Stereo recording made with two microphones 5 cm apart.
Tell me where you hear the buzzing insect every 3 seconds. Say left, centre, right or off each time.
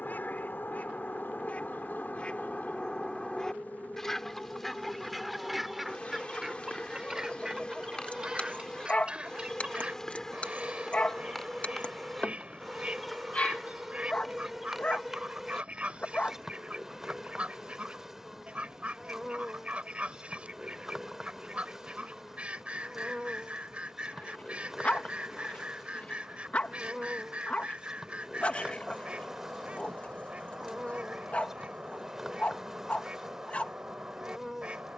left, left, left, centre, centre, centre, centre, centre, centre, centre, centre, centre.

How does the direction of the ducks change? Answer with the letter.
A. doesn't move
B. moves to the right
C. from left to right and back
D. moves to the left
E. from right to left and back
B.